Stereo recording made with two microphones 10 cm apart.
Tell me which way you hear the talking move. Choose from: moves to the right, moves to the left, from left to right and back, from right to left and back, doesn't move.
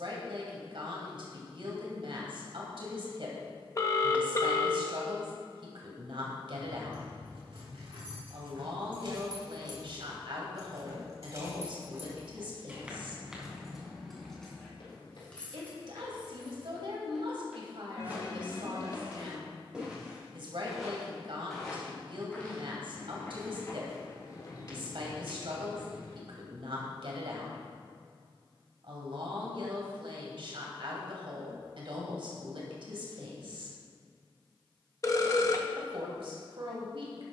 doesn't move.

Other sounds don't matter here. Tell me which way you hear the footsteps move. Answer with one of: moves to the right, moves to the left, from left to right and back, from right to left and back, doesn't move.
from left to right and back.